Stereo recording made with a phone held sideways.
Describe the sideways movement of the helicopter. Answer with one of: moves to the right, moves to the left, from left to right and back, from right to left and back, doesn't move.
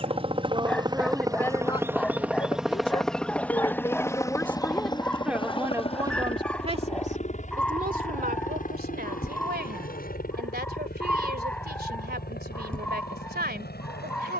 moves to the left.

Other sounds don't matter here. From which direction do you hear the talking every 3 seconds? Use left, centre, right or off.
centre, centre, right, right, right.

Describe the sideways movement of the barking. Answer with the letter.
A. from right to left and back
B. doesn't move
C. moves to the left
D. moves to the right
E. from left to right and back
B.